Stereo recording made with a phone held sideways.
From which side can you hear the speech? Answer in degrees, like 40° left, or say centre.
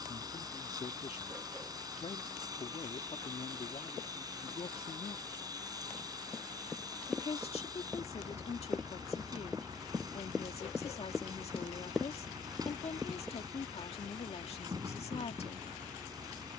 50° left.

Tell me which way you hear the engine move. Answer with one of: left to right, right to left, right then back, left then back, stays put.
stays put.